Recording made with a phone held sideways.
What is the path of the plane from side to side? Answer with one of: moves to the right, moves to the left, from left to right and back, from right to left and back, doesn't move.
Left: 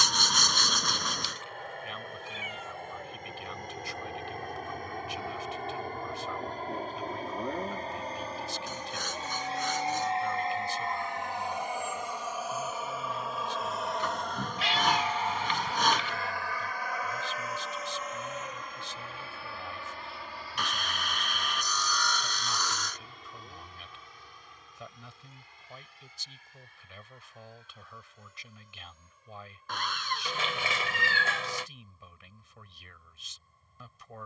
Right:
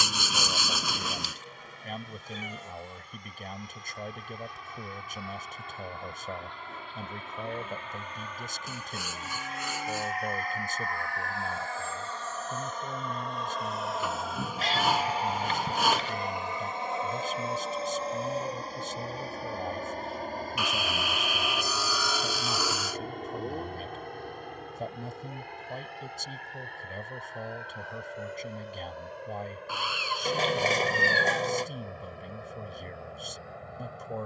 moves to the right.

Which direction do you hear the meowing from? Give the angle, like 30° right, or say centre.
40° right.